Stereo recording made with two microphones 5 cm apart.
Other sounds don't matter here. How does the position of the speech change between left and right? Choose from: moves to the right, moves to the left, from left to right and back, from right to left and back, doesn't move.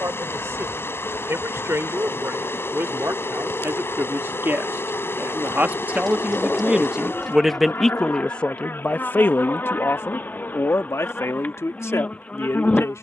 moves to the left.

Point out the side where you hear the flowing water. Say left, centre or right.
left.